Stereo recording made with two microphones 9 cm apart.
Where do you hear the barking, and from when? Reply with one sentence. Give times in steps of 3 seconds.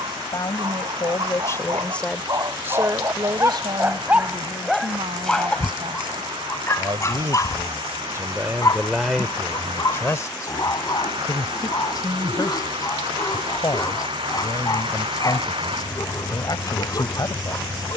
In this clip you hear the barking on the right from 0 s, in the centre from 3 s and on the left from 6 s.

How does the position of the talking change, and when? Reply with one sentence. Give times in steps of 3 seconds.
In this clip you hear the talking on the left from 0 s, on the right from 3 s and on the left from 9 s.